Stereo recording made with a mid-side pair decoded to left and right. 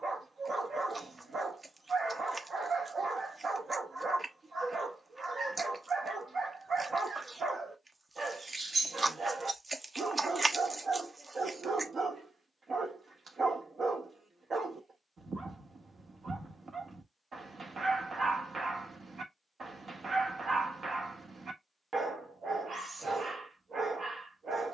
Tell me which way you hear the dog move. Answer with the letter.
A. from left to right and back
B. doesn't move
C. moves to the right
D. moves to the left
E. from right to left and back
B.